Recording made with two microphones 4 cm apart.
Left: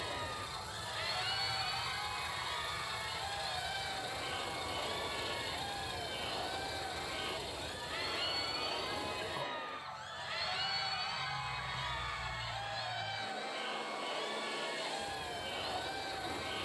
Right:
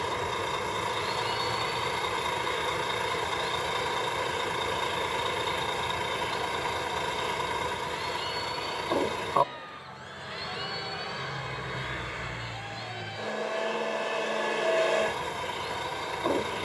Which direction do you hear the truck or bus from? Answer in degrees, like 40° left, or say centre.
70° right.